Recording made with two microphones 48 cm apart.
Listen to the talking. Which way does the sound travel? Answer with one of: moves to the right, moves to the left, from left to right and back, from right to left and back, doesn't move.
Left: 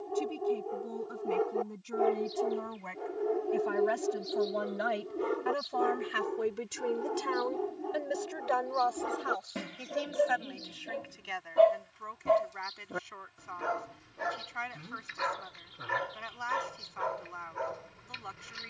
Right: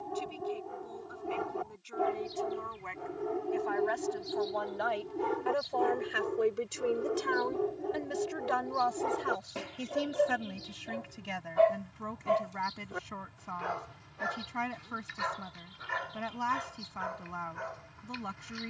moves to the right.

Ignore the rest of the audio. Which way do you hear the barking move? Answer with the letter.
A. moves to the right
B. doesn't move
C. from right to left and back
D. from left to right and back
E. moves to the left
E.